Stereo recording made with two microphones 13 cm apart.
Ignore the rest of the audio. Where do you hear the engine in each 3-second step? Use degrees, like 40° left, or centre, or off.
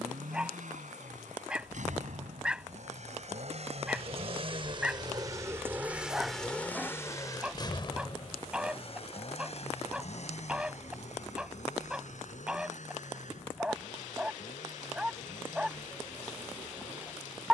70° right, 40° right, 30° left, 60° left, 70° left, 70° left.